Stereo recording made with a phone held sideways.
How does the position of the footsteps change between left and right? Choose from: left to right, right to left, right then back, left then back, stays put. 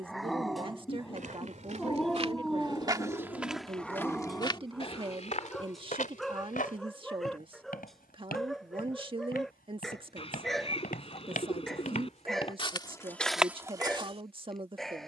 left then back.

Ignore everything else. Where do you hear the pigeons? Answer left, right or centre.
left.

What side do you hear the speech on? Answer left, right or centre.
right.